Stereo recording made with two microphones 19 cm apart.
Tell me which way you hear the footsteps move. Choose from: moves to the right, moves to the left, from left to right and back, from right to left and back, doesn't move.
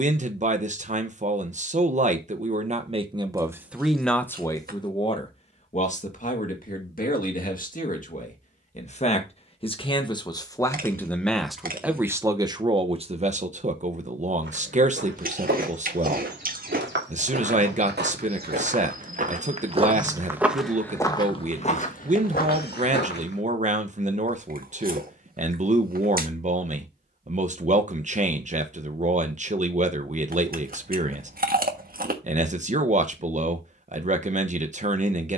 moves to the left.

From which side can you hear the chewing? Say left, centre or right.
right.